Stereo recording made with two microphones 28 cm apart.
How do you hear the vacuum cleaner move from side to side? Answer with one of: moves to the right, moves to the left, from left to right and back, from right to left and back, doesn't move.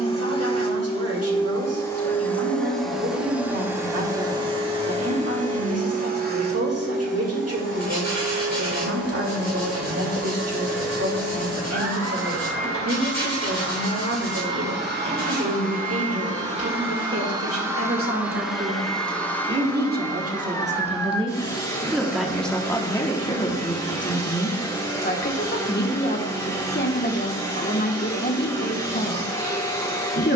from left to right and back.